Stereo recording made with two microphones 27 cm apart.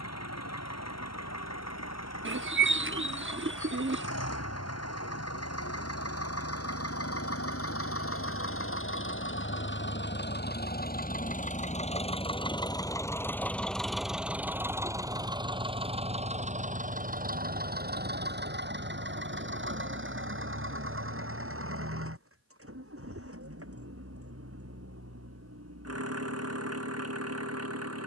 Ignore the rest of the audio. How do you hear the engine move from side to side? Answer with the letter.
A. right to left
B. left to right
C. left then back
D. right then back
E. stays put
B.